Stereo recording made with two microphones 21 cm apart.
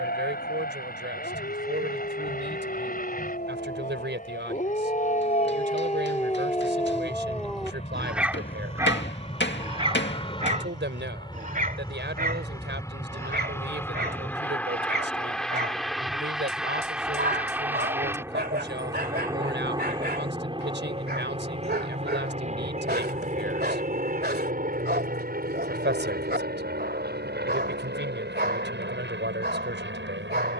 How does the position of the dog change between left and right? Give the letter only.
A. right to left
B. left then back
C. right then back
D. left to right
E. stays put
D.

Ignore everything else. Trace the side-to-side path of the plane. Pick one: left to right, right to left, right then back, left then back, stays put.
left to right.